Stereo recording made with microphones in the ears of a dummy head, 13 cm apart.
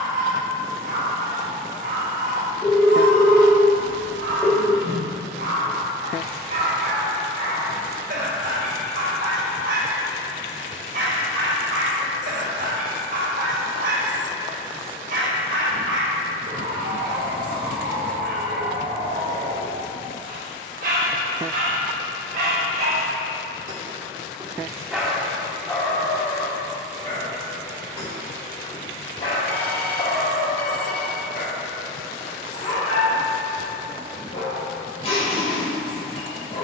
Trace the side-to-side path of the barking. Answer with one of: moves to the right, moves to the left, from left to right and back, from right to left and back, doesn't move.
moves to the left.